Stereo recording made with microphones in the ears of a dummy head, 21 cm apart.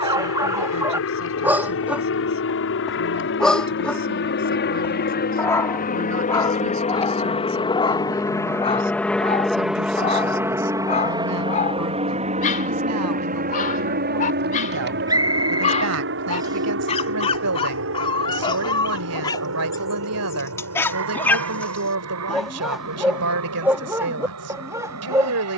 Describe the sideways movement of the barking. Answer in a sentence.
In this clip you hear the barking move from right to left and back again.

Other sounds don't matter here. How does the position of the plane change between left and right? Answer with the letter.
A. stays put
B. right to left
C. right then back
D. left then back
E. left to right
E.